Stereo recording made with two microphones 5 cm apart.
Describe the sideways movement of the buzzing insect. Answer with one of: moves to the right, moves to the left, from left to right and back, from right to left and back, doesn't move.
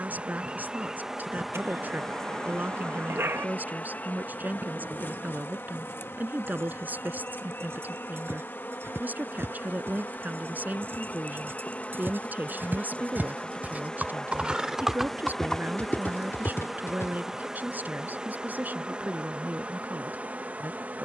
from right to left and back.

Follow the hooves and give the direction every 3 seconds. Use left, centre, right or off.
off, right, right, right, right, left, off.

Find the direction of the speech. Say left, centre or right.
right.